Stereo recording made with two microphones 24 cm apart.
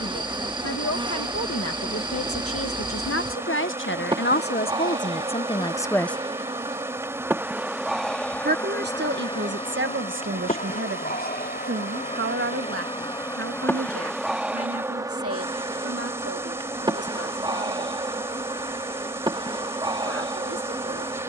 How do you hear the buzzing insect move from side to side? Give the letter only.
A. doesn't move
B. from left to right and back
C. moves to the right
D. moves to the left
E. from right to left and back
E.